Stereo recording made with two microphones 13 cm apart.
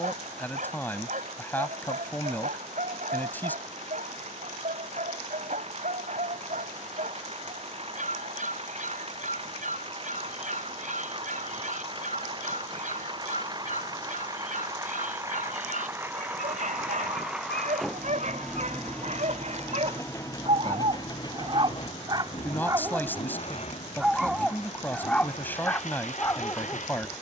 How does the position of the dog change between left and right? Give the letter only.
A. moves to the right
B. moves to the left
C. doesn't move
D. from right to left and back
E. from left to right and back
B.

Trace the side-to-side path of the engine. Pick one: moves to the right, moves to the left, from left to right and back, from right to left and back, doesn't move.
moves to the left.